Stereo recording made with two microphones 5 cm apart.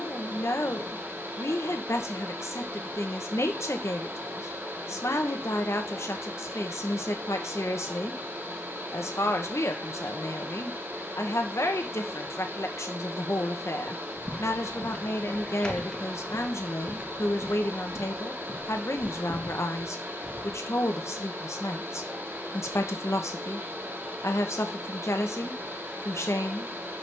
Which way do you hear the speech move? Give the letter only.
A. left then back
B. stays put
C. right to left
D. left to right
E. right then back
B.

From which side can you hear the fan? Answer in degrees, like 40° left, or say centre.
50° right.